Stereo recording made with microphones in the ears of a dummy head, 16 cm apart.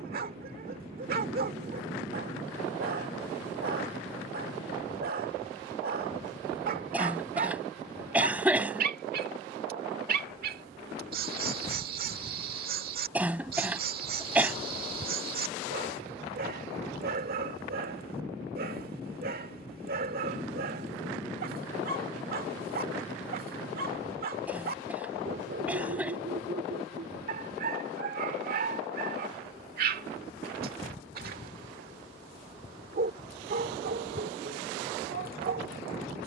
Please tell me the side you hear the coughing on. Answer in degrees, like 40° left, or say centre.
10° right.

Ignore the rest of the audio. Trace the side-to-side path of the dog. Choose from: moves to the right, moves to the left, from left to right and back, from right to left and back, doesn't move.
doesn't move.